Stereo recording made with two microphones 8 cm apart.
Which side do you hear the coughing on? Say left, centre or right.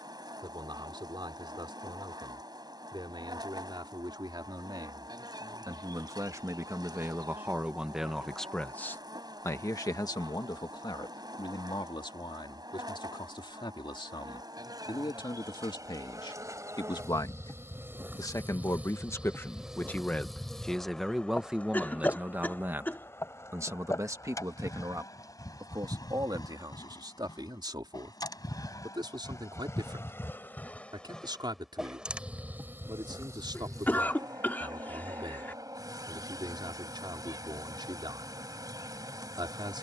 left.